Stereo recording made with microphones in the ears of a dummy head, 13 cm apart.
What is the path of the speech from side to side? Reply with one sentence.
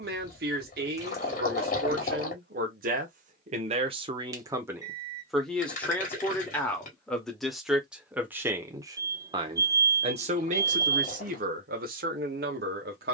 You can hear the speech go left and come back.